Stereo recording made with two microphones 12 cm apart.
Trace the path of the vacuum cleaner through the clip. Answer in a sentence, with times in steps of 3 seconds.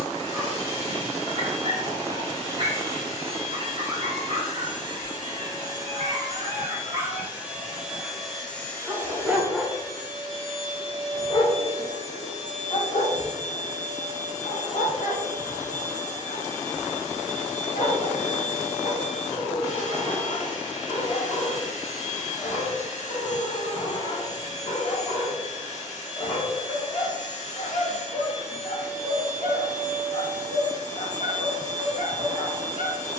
In this clip you hear the vacuum cleaner on the right from 0 s, in the centre from 6 s and on the left from 9 s.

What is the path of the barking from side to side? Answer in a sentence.
In this clip you hear the barking travel towards the left.